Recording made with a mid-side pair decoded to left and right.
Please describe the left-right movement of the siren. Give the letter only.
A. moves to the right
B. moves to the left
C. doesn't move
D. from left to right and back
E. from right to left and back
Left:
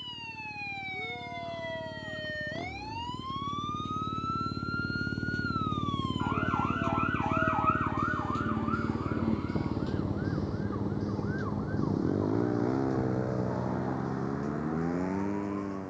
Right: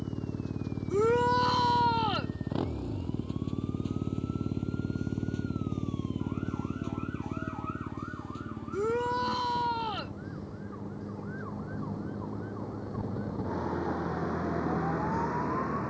A.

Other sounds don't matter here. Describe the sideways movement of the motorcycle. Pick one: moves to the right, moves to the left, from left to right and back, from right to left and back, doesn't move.
moves to the left.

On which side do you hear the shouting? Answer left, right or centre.
right.